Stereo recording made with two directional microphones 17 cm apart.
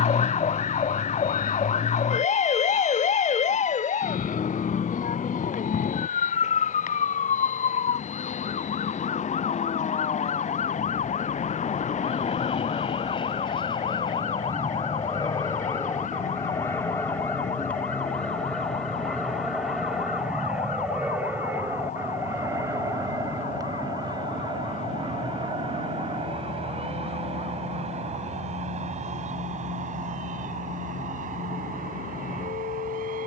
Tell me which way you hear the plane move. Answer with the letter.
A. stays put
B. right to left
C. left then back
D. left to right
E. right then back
D.